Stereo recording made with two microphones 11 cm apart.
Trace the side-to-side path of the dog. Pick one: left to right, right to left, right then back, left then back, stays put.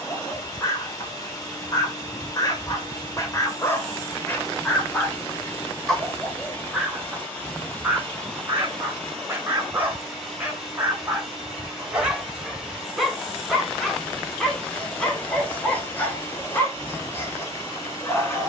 right then back.